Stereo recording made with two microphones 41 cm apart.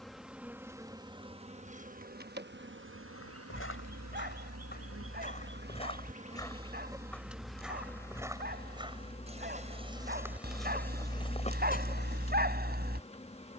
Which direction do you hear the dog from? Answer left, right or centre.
right.